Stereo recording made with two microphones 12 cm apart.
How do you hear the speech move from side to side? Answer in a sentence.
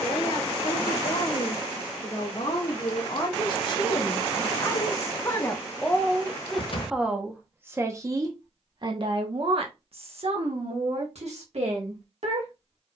You can hear the speech go from the left side to the right.